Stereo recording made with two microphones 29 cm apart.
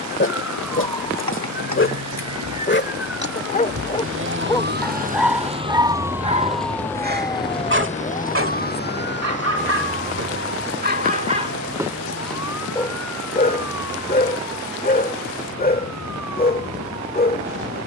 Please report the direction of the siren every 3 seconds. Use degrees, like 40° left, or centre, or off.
70° right, 40° right, 10° left, 40° left, 60° left, 60° left.